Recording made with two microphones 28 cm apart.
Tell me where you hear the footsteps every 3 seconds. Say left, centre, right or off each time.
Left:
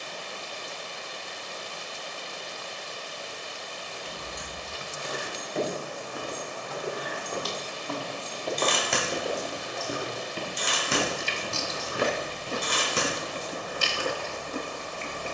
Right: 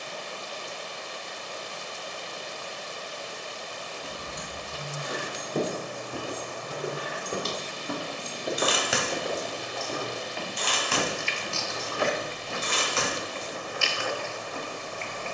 off, right, right, left, left.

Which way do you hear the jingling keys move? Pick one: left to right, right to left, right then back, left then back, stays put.
right to left.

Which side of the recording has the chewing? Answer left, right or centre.
left.